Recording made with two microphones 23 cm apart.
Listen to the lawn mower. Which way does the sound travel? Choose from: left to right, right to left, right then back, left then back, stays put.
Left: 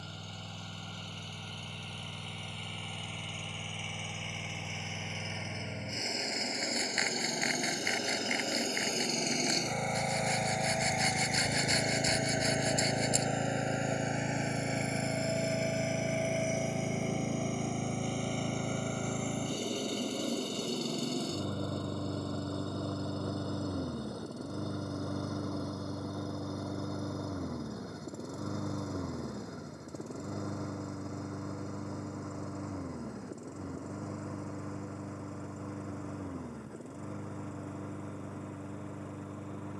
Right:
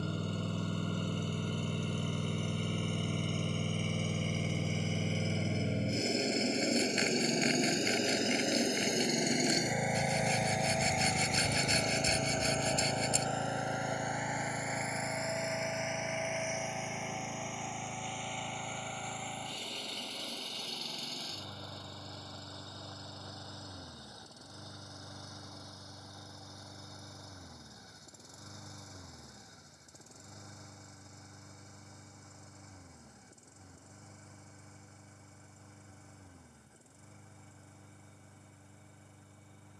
right to left.